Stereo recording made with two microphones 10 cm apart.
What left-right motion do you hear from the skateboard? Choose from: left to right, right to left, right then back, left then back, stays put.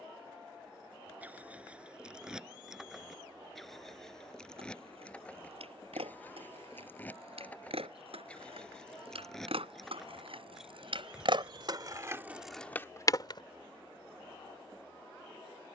right to left.